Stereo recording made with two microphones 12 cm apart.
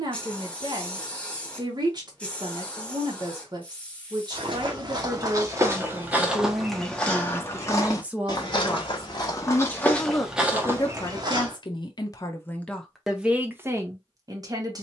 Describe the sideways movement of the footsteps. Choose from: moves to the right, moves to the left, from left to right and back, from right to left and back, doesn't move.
from right to left and back.